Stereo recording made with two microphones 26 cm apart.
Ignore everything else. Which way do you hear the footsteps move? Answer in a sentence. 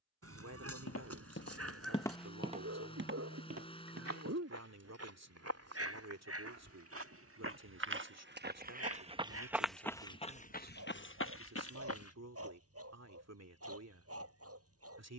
In this clip you hear the footsteps move from left to right and back again.